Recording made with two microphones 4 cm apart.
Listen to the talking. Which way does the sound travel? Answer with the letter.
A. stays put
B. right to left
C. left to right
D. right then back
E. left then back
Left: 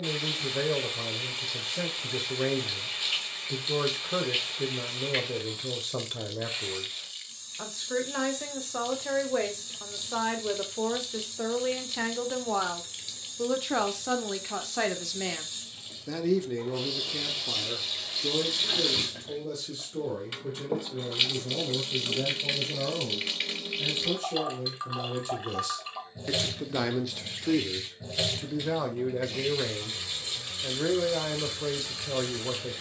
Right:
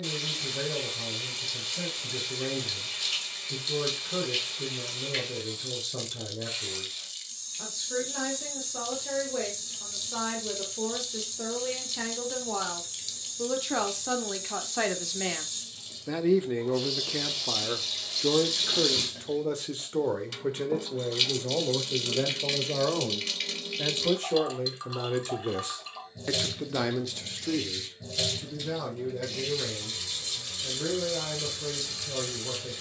D.